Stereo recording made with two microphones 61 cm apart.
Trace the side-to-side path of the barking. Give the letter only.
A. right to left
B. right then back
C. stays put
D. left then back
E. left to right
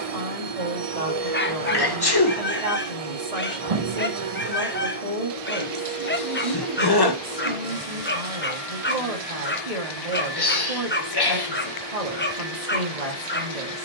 C.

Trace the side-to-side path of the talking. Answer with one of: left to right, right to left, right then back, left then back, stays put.
stays put.